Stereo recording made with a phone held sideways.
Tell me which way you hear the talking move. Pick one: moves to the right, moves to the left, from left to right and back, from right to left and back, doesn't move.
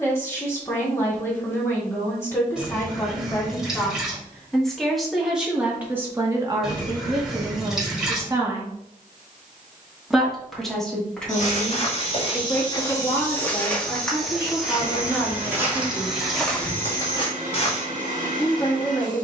from left to right and back.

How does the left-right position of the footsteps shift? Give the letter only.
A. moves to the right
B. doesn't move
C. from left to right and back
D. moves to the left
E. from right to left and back
C.